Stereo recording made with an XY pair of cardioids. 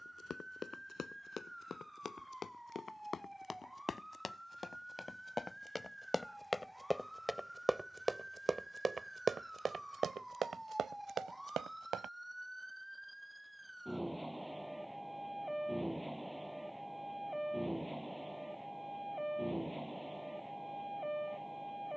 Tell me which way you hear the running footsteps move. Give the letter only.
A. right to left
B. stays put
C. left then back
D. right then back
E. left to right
E.